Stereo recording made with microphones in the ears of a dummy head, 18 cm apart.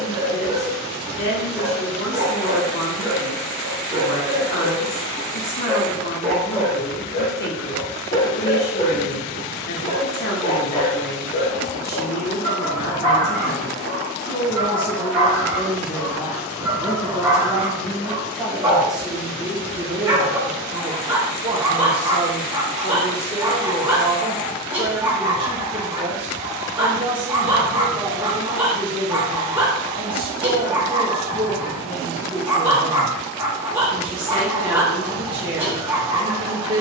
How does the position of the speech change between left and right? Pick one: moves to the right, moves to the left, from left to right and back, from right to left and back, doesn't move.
moves to the right.